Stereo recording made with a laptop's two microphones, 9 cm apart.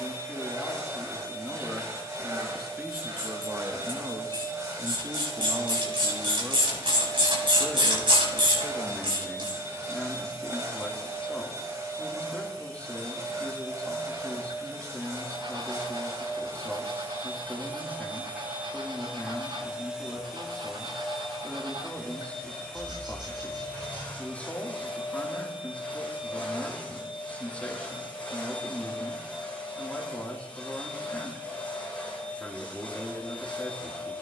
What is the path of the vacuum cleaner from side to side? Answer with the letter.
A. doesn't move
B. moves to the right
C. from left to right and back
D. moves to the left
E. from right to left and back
D.